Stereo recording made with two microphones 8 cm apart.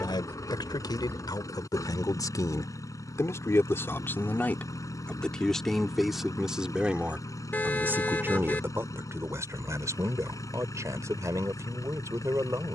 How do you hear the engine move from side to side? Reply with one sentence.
You can hear the engine stay put.